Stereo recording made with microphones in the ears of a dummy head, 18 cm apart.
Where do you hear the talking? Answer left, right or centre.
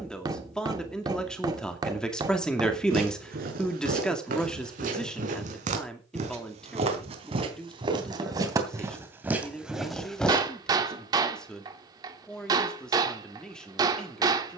centre.